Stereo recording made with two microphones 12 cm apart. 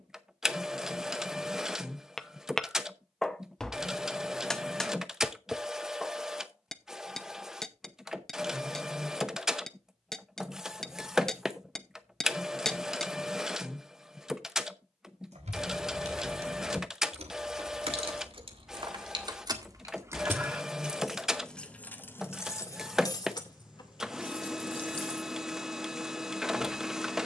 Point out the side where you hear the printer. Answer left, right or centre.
centre.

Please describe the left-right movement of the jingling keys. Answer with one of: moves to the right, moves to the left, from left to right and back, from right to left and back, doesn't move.
moves to the left.